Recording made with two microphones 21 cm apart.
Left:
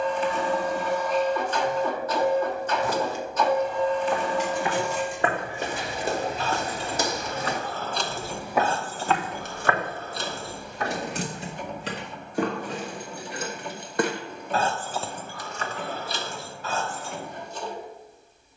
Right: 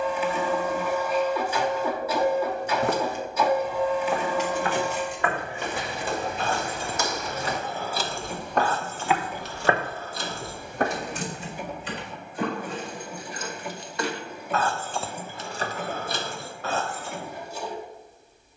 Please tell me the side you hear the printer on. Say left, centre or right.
centre.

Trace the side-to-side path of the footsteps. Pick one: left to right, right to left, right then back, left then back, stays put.
left then back.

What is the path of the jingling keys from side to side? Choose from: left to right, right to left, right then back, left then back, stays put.
left then back.